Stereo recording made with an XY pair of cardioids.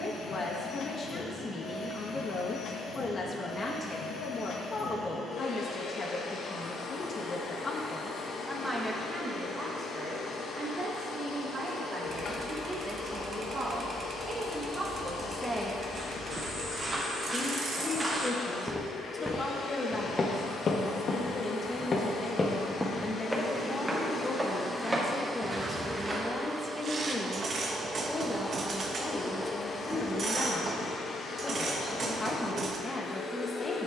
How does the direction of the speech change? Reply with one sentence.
You can hear the speech move from left to right and back again.